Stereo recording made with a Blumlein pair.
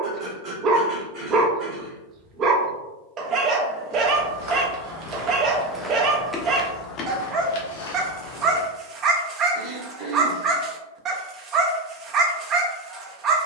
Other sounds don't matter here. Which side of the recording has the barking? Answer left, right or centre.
right.